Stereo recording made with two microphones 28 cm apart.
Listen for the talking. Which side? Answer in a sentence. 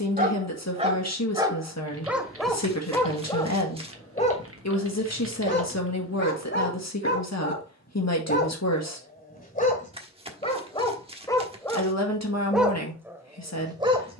In this clip you hear the talking on the left.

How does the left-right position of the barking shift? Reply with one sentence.
In this clip you hear the barking go left and come back.